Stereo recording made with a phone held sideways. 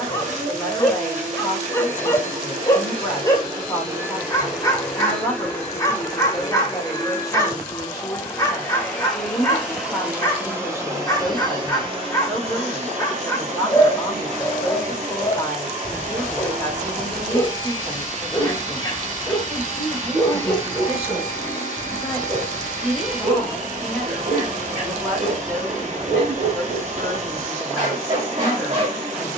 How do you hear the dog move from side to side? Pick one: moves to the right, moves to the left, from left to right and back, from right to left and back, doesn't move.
moves to the right.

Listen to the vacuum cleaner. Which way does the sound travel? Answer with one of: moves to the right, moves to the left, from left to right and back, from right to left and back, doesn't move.
from right to left and back.